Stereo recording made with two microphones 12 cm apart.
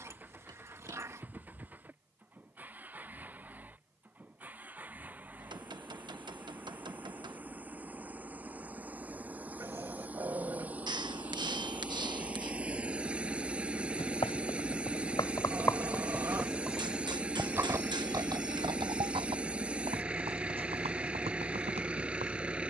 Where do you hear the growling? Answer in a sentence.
In this clip you hear the growling on the right.